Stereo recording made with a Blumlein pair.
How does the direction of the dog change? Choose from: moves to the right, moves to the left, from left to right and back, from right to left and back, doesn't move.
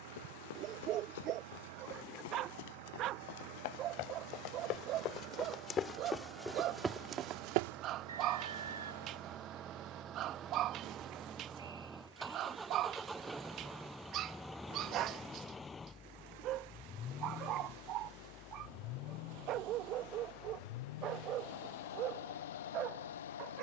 doesn't move.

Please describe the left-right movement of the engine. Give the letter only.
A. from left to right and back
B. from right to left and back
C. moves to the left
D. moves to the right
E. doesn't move
C.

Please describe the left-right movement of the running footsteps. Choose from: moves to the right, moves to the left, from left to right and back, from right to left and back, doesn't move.
moves to the right.